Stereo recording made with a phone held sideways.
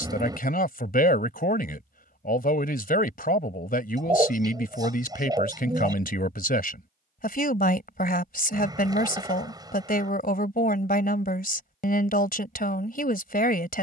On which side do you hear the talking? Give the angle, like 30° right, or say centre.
70° left.